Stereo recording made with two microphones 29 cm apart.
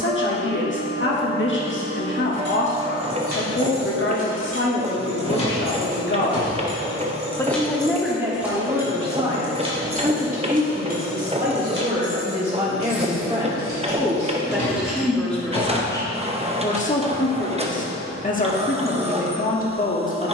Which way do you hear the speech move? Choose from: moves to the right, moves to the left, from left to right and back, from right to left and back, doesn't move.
from left to right and back.